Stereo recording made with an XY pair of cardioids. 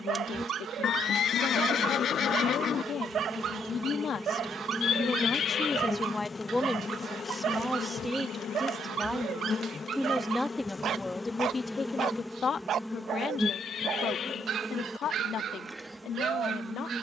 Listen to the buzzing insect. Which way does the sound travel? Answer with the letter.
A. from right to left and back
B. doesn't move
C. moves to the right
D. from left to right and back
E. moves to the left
A.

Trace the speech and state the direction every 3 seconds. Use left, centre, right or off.
left, left, centre, centre, left, left.